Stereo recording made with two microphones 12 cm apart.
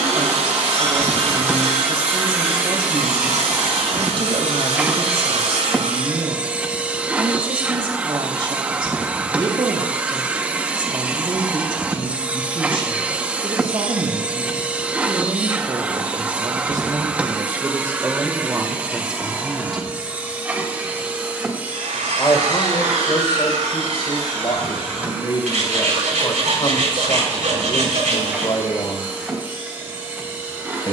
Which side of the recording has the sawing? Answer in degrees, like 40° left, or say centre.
80° right.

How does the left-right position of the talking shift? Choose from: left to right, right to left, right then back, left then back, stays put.
right to left.